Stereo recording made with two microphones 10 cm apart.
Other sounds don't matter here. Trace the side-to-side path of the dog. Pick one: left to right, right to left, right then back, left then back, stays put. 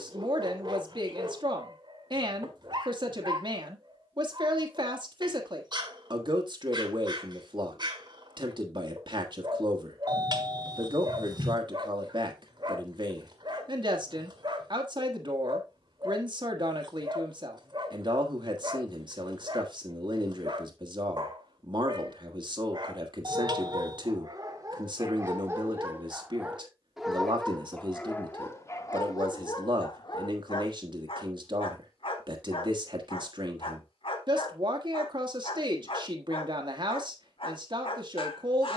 right to left.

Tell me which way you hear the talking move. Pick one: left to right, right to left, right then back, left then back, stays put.
stays put.